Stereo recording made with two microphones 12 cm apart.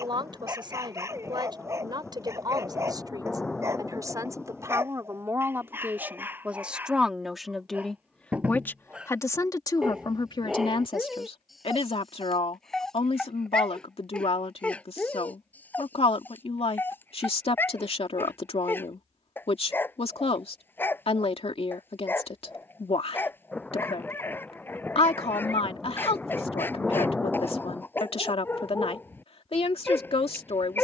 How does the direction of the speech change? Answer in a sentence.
In this clip you hear the speech move from right to left.